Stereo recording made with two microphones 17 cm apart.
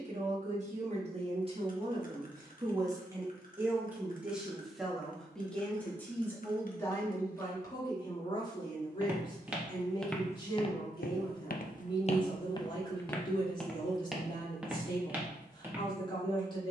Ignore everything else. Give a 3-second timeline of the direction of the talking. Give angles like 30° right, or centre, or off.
30° right, centre, 20° left, 30° left, 30° left, 30° left.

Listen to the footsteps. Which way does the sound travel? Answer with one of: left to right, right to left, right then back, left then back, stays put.
left then back.